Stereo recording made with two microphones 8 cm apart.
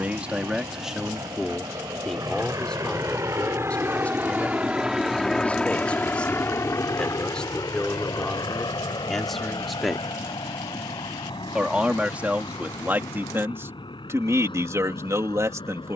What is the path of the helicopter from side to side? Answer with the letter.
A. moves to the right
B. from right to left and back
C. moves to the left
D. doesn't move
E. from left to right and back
C.